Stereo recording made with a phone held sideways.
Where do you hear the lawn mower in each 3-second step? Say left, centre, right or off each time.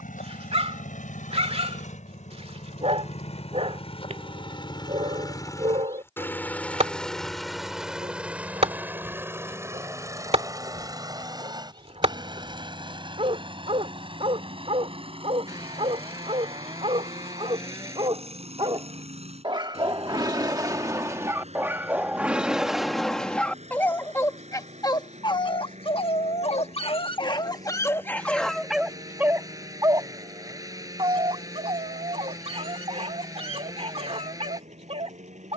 left, left, centre, right, right, right, right, right, right, right, right, right.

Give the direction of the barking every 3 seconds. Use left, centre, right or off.
right, right, right, right, right, right, right, centre, left, centre, right, right.